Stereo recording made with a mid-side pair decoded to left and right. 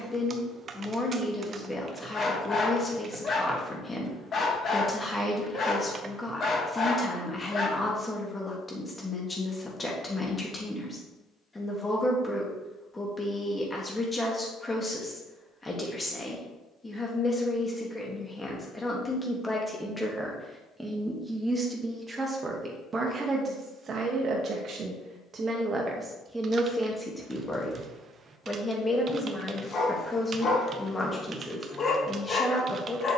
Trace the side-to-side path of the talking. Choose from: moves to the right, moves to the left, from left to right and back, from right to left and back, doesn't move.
from left to right and back.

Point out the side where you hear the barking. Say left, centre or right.
left.